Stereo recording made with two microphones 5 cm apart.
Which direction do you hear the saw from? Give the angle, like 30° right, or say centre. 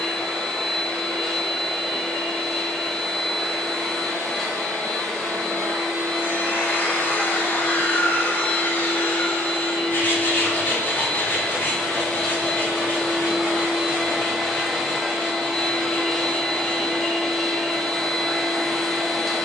40° left.